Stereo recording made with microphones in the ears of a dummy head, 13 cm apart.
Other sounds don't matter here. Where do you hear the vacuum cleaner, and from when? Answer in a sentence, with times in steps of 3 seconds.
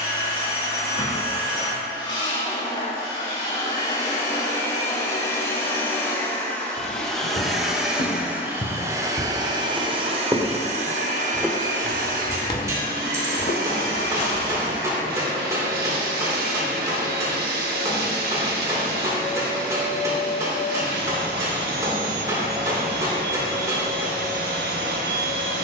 You can hear the vacuum cleaner on the left from 0 s, in the centre from 6 s and on the right from 9 s.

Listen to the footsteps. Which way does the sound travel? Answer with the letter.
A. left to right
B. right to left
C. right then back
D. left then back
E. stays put
C.